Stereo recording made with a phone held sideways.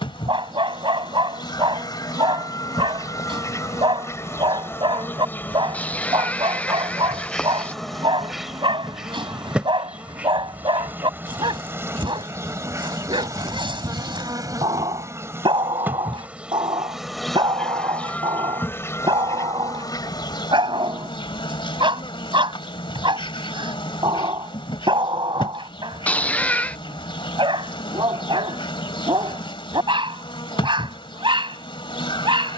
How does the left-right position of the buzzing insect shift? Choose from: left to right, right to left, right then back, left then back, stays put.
right then back.